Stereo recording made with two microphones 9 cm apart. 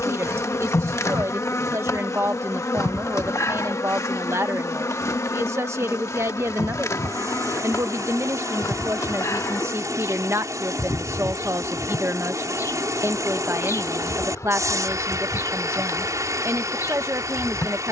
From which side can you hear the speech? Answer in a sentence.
You can hear the speech on the right.